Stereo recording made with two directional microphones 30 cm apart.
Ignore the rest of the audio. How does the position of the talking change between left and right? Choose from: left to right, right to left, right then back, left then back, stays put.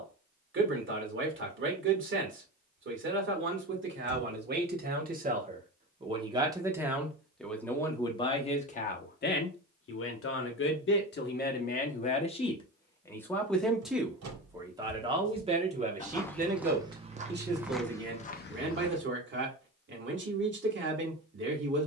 left then back.